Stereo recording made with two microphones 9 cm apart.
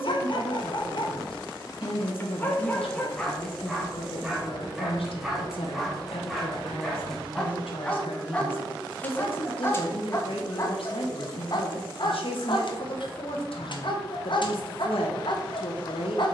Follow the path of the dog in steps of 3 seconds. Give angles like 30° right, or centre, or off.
40° left, centre, 10° left, 30° left, 60° left, 60° left.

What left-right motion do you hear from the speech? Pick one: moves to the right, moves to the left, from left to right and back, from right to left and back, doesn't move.
doesn't move.